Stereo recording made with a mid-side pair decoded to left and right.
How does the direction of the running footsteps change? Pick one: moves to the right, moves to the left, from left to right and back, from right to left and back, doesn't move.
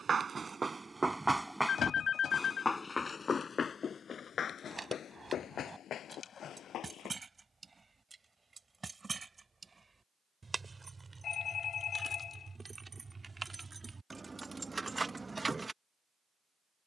moves to the left.